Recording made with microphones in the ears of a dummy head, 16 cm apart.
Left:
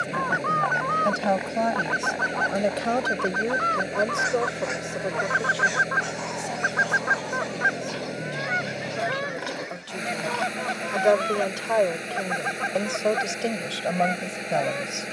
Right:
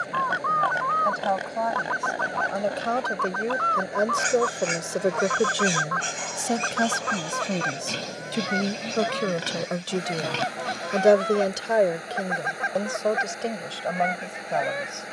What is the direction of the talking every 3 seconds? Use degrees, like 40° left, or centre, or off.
30° left, 30° right, 70° right, 40° right, 10° left.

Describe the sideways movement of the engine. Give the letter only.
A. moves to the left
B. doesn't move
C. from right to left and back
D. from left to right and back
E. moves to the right
B.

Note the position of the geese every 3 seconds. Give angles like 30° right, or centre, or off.
30° left, 20° left, 10° left, centre, centre.